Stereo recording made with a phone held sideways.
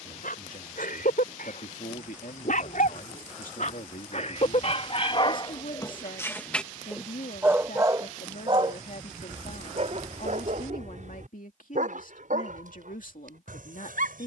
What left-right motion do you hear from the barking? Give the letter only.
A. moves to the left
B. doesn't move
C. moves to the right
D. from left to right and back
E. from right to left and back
C.